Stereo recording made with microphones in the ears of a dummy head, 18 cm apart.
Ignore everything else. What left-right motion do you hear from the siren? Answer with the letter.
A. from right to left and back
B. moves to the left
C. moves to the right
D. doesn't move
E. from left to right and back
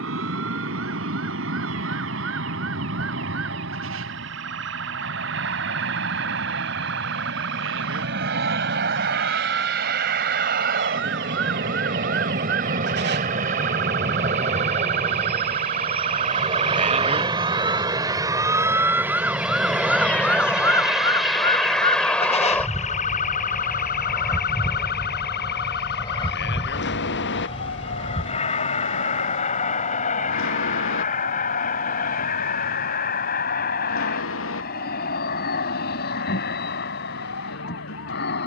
B.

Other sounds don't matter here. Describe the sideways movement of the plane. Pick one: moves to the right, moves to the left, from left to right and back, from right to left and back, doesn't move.
moves to the left.